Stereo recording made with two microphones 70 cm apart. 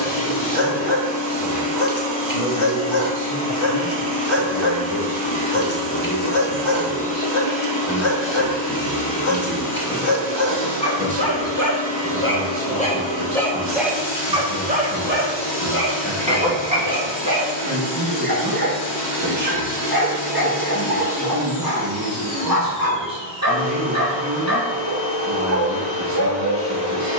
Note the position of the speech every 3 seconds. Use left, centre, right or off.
left, left, left, centre, right, right, right, right, right.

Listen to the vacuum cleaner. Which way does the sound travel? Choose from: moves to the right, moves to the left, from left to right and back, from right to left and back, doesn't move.
doesn't move.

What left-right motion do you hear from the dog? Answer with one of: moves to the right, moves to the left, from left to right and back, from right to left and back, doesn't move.
moves to the right.